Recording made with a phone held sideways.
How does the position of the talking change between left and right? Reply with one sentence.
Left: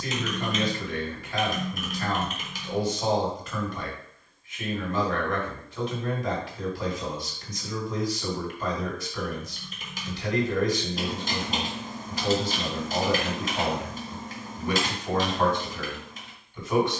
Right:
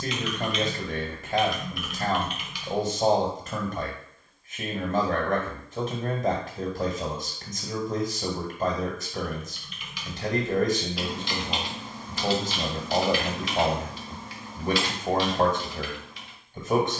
You can hear the talking stay in one place.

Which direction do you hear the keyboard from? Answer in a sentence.
You can hear the keyboard on the left.